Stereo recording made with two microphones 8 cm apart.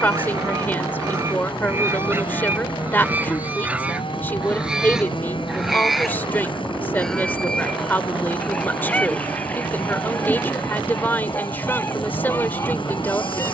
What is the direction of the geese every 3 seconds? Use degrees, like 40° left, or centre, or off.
30° right, 10° right, 10° left, 20° left, 30° left.